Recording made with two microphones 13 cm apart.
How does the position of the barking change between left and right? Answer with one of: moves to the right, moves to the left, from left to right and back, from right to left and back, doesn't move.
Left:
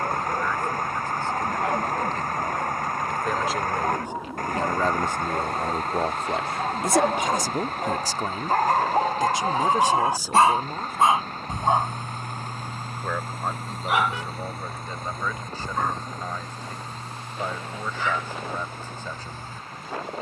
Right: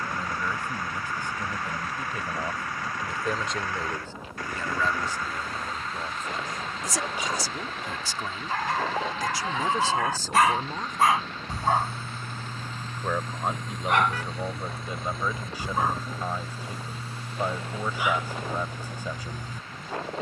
moves to the right.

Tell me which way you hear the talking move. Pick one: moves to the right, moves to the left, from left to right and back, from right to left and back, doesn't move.
from right to left and back.